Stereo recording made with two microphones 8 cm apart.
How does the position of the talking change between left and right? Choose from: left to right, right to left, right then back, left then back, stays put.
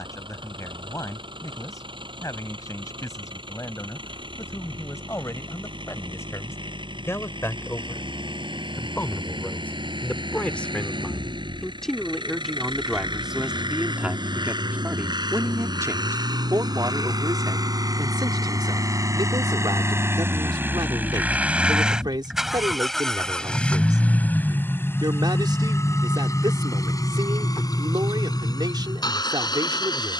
left to right.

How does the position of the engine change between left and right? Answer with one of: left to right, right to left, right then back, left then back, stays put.
right to left.